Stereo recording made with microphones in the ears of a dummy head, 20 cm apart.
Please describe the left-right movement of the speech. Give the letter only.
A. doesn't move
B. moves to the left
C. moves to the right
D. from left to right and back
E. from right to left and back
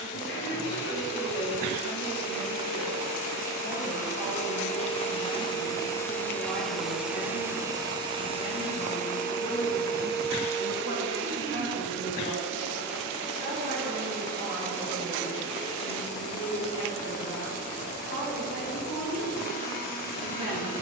D.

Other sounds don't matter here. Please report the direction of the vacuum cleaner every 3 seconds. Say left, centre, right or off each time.
left, left, centre, right, right, left, left.